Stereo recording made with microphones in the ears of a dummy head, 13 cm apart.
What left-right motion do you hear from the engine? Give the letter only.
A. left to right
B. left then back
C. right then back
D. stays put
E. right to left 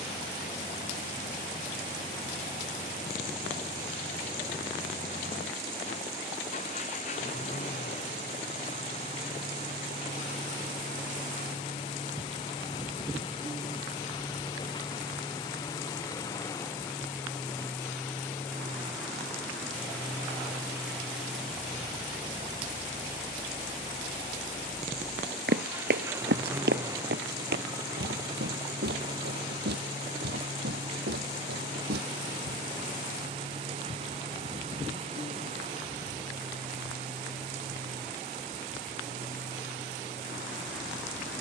A.